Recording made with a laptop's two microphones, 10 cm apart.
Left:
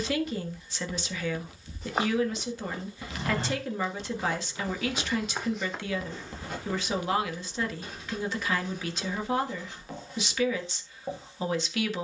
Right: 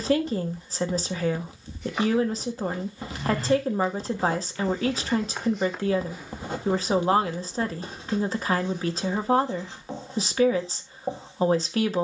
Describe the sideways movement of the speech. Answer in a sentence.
In this clip you hear the speech stay in one place.